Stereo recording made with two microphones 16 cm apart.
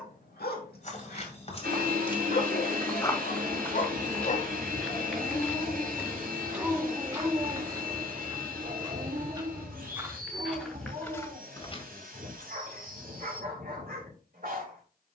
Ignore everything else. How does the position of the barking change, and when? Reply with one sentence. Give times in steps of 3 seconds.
You can hear the barking on the left from 0 s and on the right from 6 s.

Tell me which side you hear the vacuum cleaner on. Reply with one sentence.
You can hear the vacuum cleaner on the right.